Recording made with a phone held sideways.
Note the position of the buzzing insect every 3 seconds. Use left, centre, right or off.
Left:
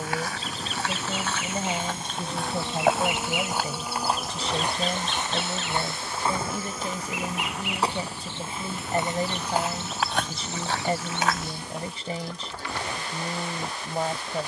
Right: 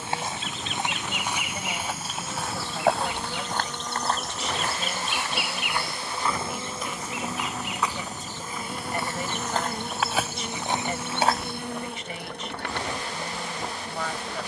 left, centre, right, right, right.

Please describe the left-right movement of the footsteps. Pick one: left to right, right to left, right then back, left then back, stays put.
left then back.